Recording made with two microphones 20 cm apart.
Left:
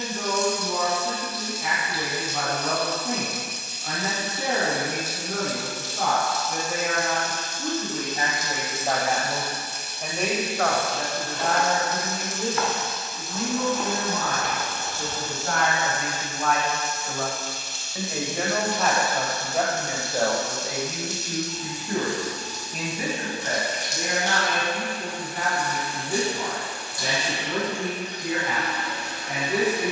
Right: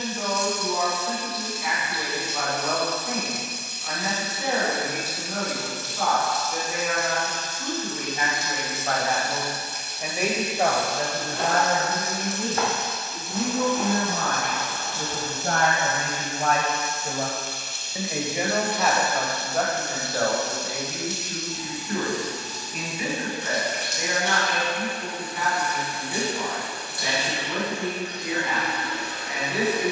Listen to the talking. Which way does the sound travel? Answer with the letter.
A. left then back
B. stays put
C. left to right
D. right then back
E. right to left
D.